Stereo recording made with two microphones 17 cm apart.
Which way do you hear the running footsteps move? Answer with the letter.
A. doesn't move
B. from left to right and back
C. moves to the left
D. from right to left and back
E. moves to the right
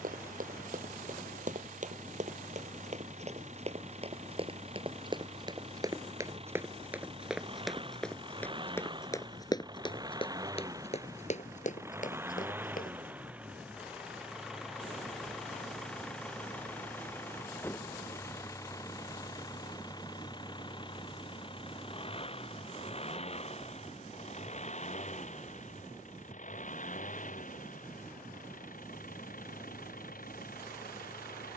C.